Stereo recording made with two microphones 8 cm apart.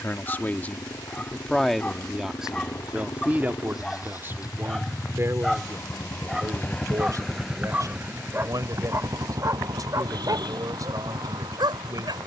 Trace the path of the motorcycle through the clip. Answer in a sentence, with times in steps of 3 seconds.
You can hear the motorcycle on the left from 0 s, in the centre from 6 s and on the right from 9 s.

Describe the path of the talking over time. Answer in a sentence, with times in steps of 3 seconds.
You can hear the talking in the centre from 0 s and on the right from 3 s.